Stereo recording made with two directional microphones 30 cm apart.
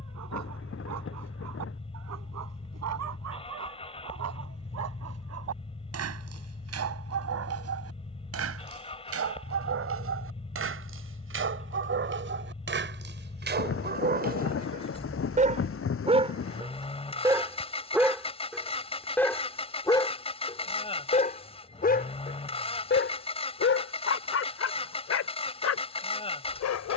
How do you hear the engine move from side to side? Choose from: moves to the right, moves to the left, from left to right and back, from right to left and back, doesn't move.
doesn't move.